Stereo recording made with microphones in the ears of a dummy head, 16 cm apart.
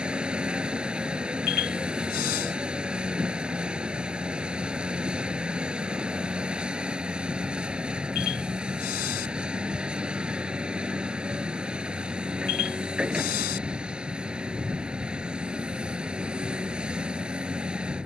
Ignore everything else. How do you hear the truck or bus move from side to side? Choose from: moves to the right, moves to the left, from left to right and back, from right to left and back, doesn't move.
doesn't move.